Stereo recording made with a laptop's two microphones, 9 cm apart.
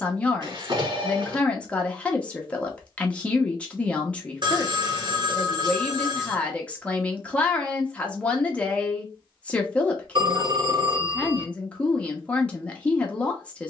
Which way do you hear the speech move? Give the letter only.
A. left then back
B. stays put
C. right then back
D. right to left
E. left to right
B.